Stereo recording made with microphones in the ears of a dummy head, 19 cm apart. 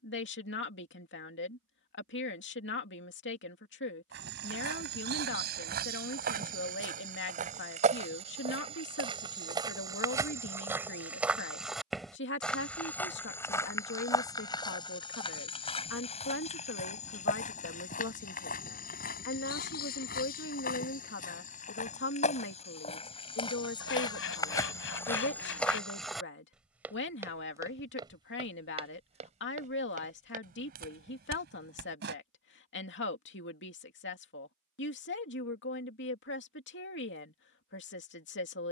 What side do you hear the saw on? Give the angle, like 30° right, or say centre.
70° left.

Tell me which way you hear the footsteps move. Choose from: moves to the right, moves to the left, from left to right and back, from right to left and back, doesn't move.
from right to left and back.